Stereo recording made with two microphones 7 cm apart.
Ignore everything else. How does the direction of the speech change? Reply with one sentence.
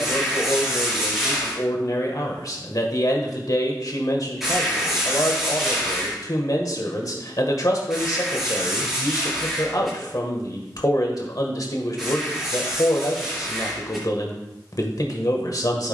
In this clip you hear the speech stay put.